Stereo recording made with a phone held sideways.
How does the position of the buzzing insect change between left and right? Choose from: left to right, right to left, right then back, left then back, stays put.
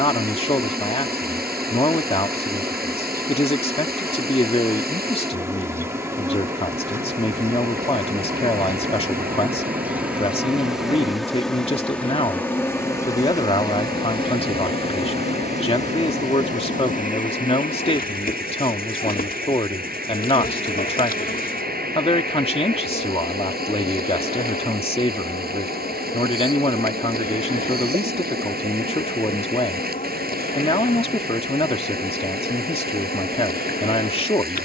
right to left.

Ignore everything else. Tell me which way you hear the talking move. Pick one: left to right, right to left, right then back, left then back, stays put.
stays put.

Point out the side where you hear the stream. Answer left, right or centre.
right.